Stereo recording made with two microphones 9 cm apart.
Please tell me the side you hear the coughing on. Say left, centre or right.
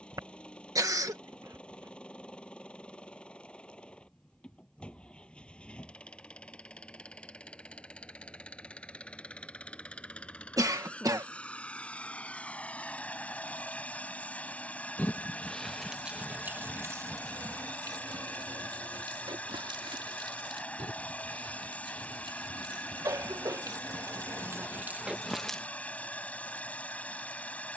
right.